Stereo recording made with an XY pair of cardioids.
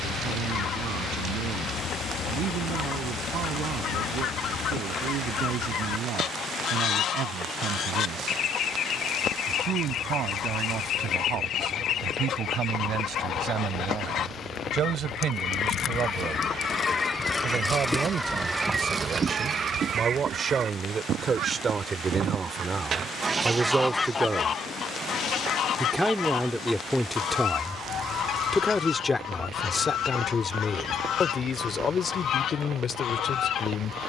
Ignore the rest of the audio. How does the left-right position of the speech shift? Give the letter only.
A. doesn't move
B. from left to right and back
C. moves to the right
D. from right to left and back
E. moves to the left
E.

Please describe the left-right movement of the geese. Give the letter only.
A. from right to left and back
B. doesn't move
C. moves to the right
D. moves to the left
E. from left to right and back
E.